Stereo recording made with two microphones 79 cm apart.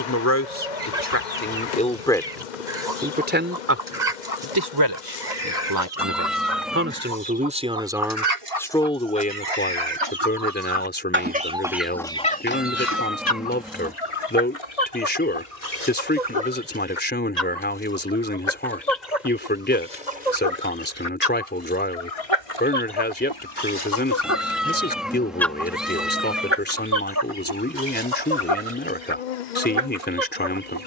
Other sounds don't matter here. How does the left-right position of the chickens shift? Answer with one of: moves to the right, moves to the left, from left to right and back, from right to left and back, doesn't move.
from right to left and back.